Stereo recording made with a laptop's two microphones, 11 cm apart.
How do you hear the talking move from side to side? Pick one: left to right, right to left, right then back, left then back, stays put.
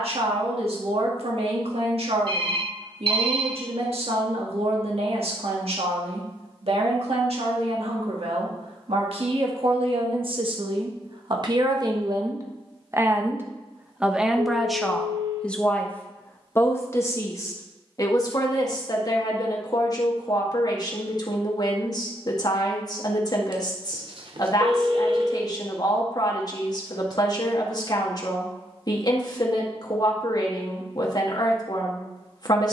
right to left.